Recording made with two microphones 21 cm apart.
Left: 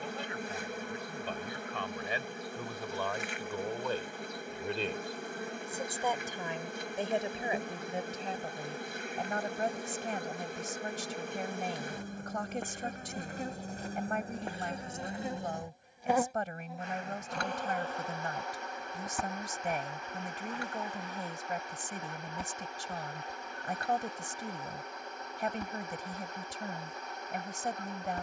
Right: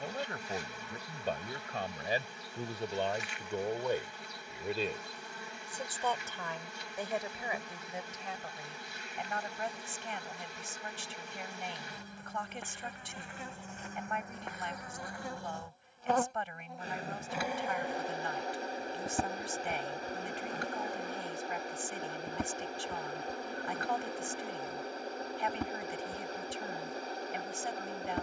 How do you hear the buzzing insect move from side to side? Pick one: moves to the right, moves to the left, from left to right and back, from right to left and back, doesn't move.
moves to the right.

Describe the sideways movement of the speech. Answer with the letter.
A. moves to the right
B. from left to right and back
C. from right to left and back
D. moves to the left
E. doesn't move
D.